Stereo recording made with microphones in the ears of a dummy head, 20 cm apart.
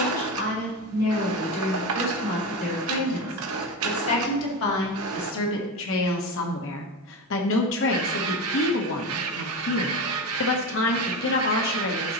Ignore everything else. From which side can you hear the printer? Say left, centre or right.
right.